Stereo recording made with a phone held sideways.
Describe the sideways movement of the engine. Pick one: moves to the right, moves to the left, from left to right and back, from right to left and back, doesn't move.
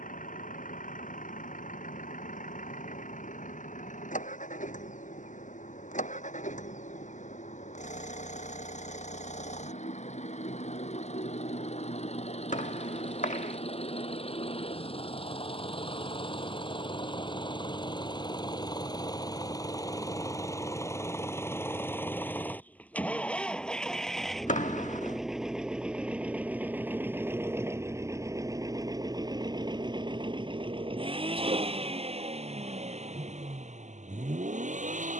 moves to the right.